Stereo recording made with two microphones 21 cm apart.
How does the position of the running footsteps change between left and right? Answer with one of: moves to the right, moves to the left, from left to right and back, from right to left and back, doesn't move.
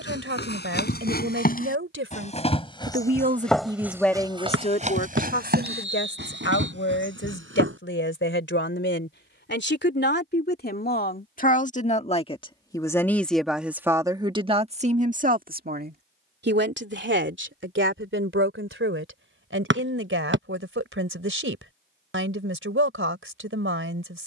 moves to the right.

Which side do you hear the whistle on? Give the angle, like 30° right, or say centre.
60° right.